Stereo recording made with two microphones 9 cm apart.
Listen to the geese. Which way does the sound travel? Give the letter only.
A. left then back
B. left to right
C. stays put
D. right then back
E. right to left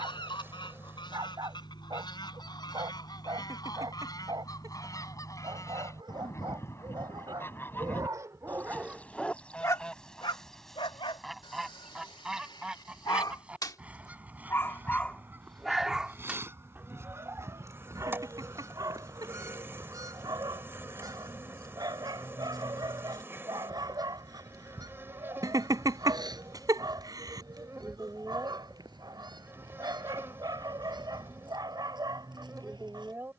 B.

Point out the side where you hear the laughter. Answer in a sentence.
In this clip you hear the laughter on the right.